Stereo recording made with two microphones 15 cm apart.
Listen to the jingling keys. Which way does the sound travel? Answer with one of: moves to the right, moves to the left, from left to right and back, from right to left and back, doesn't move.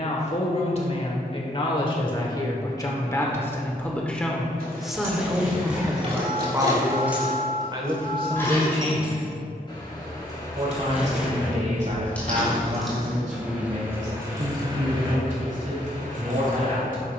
from right to left and back.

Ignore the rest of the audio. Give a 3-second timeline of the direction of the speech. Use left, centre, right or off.
left, centre, right, right, right, right.